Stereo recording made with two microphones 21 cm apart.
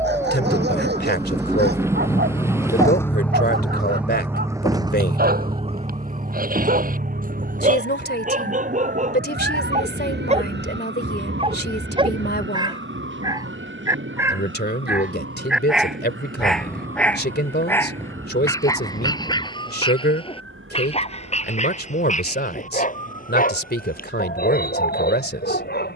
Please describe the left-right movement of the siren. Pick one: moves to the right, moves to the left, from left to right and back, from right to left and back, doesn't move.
moves to the right.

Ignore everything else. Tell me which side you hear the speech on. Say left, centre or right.
left.